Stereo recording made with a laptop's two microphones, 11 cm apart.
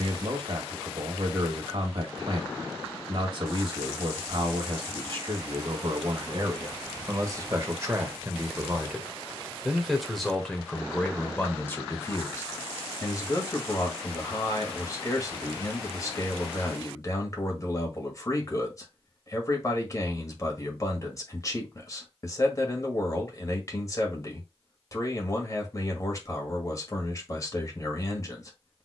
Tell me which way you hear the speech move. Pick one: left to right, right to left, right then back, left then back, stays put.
right to left.